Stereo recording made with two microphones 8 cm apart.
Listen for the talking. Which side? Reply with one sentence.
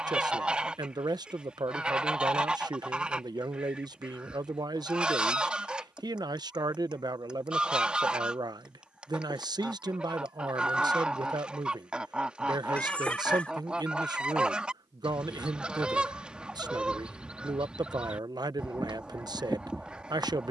You can hear the talking on the right.